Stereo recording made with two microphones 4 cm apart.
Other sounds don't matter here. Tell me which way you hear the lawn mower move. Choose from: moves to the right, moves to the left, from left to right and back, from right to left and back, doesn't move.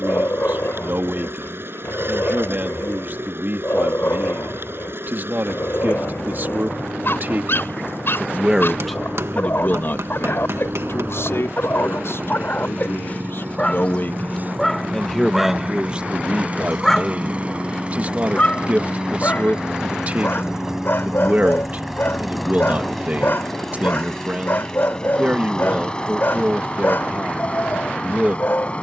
moves to the left.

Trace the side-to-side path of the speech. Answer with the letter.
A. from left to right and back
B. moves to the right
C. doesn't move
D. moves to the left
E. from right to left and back
E.